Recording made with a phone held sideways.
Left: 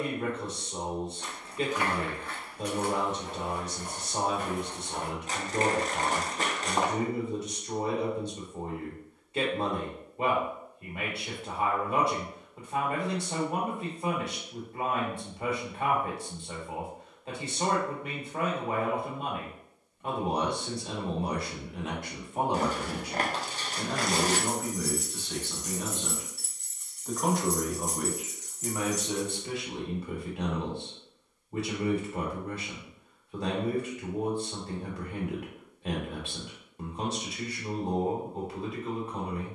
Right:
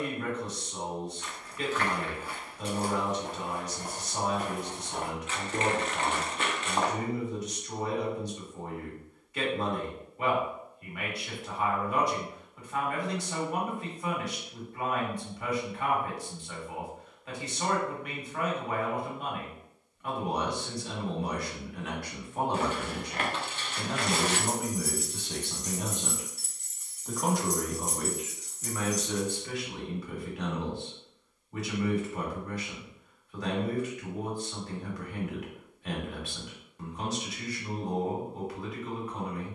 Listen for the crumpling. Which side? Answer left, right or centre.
left.